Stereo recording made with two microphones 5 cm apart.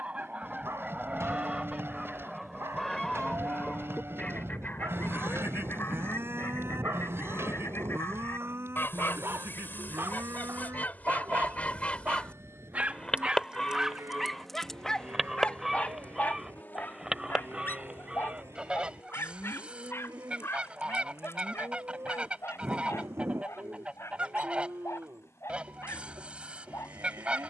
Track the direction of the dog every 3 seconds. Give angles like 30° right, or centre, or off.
80° right, 80° right, 70° right, 60° right, 10° right, 40° left, 60° left, 70° left, 80° left.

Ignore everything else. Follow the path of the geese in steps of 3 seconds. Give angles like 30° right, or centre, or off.
20° right, 30° left, 60° left, 40° left, 10° left, 10° right, 20° right, 30° right, 30° right.